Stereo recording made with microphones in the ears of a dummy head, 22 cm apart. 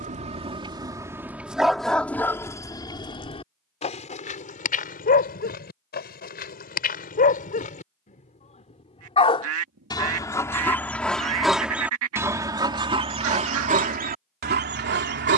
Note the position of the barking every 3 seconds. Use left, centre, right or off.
centre, left, left, centre, right.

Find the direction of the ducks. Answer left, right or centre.
right.